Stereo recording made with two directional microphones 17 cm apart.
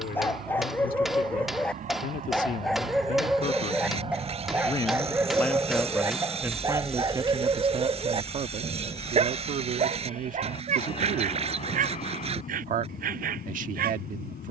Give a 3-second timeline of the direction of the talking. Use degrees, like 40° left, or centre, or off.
50° left, 20° left, 30° right, 50° right, 50° right.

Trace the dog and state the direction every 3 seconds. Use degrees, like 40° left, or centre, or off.
10° left, 10° right, 30° right, 40° right, 60° right.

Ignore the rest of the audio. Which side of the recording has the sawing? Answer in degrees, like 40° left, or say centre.
40° right.